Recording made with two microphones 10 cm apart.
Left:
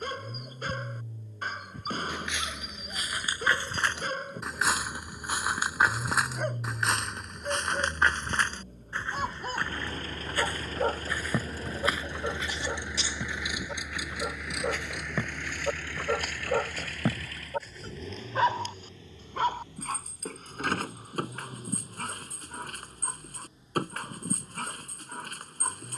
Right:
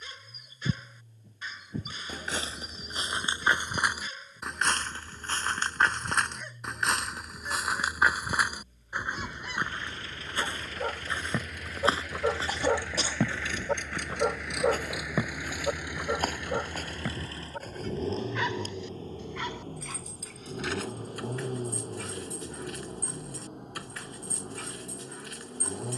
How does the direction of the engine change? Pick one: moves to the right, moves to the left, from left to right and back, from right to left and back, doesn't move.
moves to the right.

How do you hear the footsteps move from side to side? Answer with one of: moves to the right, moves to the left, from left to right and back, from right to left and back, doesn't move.
from right to left and back.